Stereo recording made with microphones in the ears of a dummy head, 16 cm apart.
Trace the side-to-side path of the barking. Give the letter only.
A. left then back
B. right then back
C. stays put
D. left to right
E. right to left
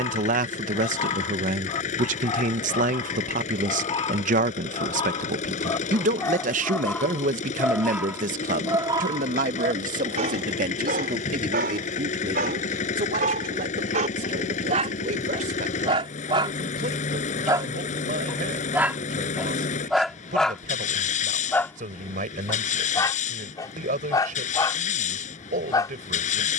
B.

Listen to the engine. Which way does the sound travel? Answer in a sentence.
You can hear the engine stay in one place.